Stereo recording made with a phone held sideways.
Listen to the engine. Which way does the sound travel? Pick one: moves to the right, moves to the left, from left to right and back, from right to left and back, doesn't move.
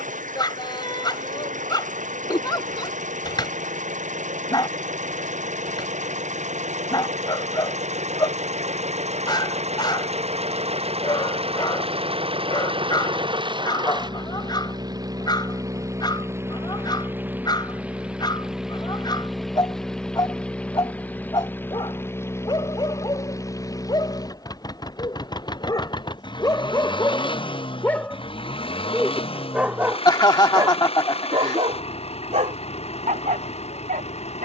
moves to the left.